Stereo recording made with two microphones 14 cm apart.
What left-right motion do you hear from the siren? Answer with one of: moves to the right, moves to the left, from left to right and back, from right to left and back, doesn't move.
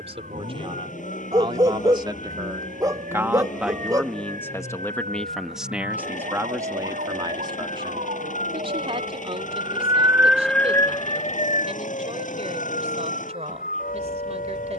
moves to the left.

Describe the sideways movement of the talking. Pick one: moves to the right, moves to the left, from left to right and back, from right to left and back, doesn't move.
from right to left and back.